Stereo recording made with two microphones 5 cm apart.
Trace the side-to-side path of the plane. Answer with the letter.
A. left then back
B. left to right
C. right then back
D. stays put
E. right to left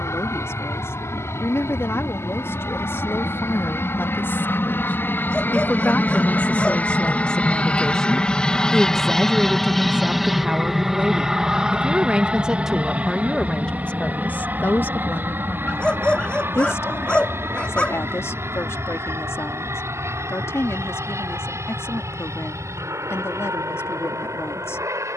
B.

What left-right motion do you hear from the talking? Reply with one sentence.
You can hear the talking go right and come back.